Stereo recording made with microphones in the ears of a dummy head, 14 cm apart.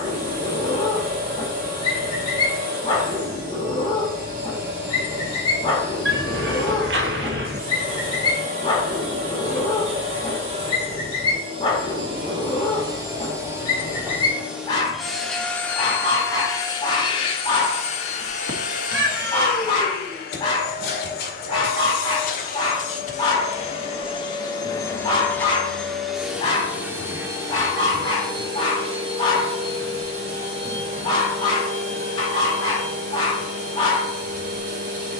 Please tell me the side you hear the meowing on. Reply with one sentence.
In this clip you hear the meowing on the right.